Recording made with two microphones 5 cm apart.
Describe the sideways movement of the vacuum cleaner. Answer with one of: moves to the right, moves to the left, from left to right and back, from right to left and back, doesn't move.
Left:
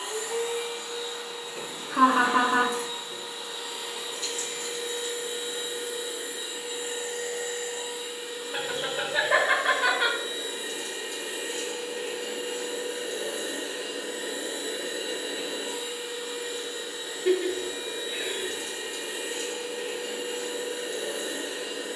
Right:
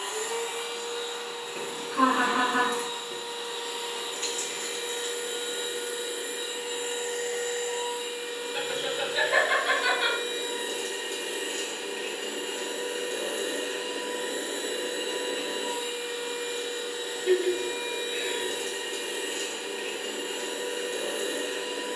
doesn't move.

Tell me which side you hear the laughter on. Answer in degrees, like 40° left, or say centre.
70° left.